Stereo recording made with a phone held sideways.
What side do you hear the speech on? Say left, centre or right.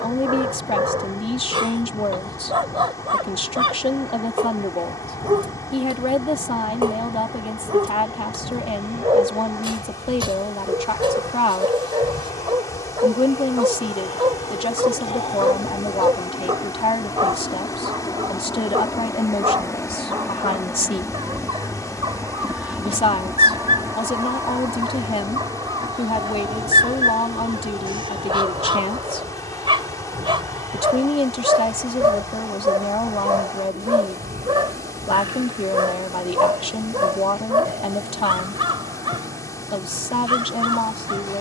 left.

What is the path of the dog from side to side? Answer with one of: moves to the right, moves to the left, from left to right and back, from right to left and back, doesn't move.
doesn't move.